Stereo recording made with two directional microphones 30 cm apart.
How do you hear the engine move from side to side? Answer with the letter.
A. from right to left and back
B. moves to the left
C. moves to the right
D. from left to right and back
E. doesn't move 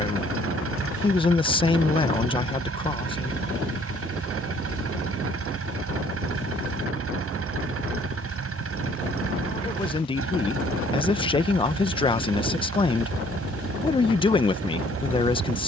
E.